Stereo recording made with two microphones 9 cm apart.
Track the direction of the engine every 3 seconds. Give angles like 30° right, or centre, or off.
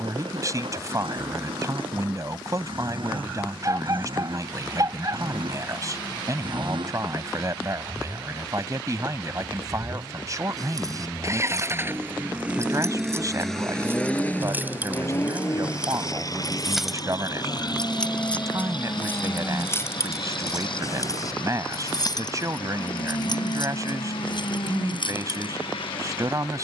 80° right, 70° right, 70° right, 40° right, centre, 40° left, 60° left, 70° left, 70° left.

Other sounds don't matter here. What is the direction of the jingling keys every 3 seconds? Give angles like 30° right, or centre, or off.
off, off, off, 40° right, 30° right, 10° right, 30° left, 50° left, 60° left.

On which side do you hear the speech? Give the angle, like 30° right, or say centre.
40° right.